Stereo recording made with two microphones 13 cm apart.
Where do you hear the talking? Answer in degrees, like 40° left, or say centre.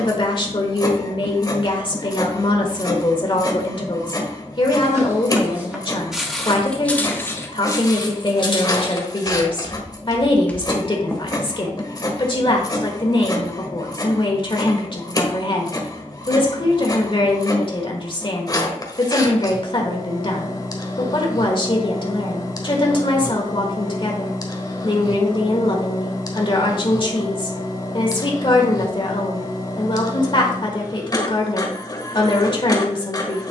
40° left.